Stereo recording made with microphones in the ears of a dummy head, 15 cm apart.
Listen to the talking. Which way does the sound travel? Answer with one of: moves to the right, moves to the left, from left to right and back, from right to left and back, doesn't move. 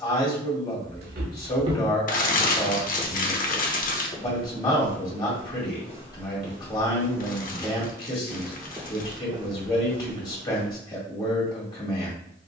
doesn't move.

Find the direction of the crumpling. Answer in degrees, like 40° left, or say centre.
50° left.